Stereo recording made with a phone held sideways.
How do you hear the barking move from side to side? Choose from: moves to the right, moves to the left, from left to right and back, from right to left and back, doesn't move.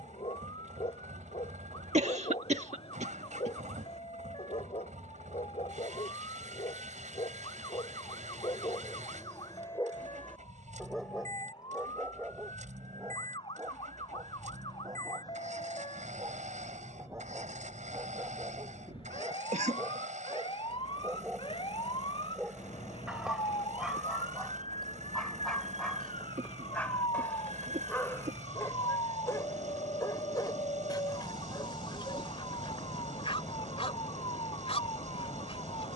from left to right and back.